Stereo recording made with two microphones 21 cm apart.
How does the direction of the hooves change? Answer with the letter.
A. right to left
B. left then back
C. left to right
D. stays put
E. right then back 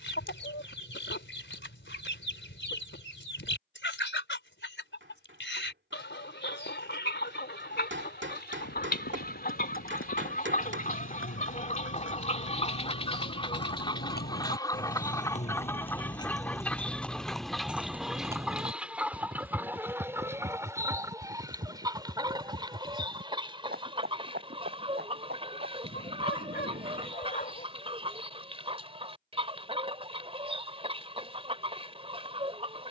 C.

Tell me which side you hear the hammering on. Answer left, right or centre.
right.